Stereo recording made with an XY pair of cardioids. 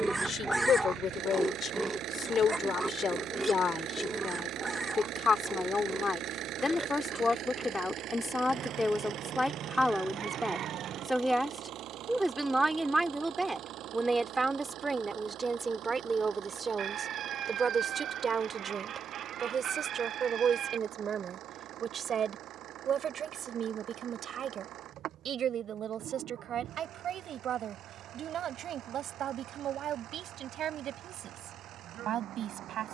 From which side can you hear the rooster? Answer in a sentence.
You can hear the rooster on the right.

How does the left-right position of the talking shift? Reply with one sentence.
In this clip you hear the talking move from left to right.